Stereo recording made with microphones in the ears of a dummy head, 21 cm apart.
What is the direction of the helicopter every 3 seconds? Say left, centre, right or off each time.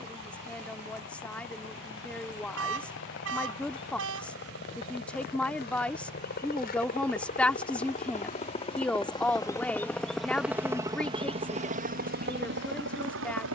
left, left, left, centre, right.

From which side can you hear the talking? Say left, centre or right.
centre.